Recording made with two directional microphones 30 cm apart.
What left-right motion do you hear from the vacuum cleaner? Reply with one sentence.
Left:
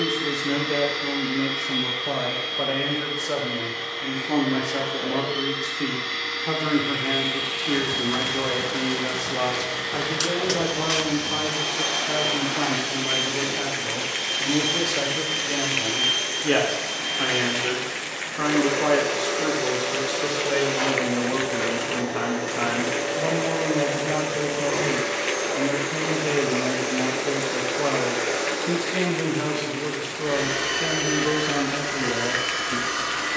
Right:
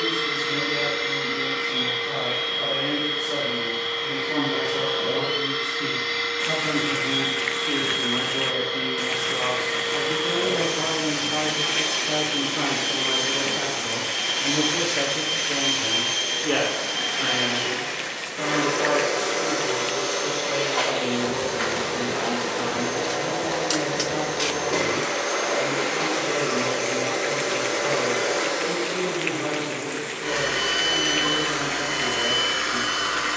In this clip you hear the vacuum cleaner stay in one place.